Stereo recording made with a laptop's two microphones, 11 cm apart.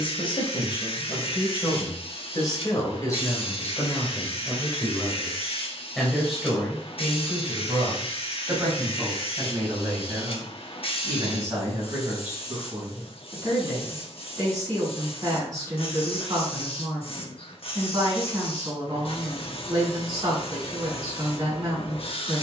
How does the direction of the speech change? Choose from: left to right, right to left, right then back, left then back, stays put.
left to right.